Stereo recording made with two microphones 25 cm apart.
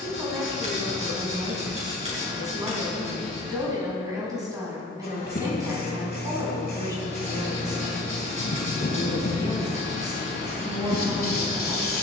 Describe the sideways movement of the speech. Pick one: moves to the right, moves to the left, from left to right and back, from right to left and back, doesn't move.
doesn't move.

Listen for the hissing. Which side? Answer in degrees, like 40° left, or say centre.
40° left.